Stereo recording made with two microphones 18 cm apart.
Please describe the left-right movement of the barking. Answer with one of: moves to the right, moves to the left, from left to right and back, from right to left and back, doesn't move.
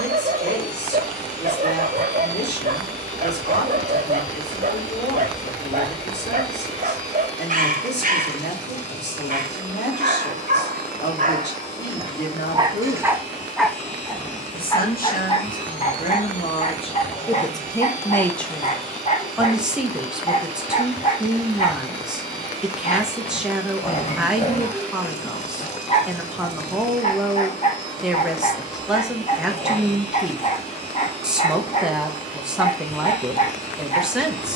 moves to the left.